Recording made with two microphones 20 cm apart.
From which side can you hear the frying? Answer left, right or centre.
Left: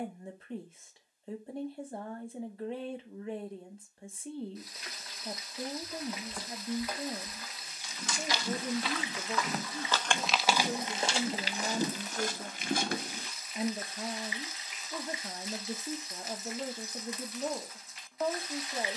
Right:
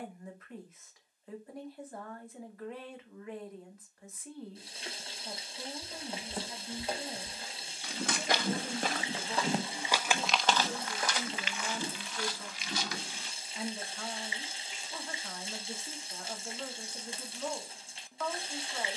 right.